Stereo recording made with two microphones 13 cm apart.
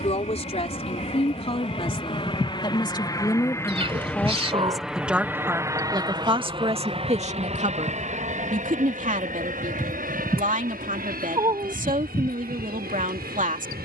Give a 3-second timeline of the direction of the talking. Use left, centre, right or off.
left, centre, right, right, right.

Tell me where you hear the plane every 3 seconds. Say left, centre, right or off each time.
left, centre, right, right, right.